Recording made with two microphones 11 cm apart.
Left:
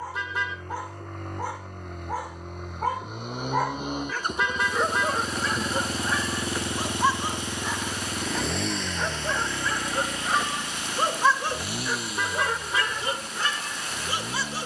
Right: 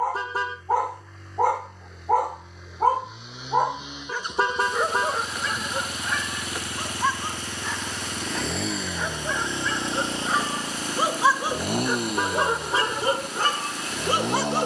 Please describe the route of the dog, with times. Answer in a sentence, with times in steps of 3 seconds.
You can hear the dog on the right from 0 s, in the centre from 3 s and on the right from 12 s.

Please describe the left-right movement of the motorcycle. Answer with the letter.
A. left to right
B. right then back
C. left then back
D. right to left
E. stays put
A.